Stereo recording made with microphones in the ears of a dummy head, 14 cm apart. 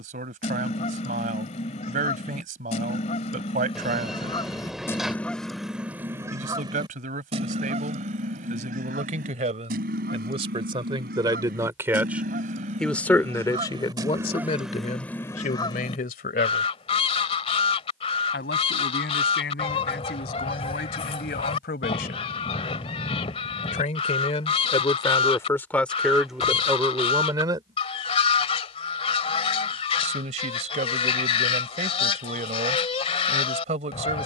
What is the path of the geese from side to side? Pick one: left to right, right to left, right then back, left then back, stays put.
right then back.